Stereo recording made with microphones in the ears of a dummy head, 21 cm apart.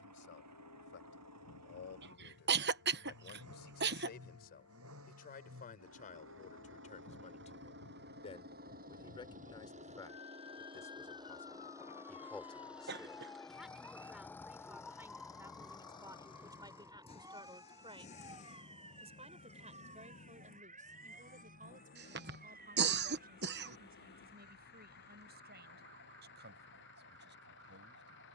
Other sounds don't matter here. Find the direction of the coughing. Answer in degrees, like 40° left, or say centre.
50° right.